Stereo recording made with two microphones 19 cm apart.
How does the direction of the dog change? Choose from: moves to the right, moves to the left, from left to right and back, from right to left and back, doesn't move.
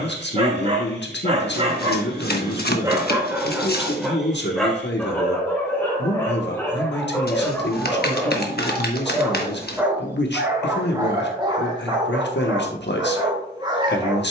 from right to left and back.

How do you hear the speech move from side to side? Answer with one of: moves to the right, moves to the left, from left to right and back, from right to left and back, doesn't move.
doesn't move.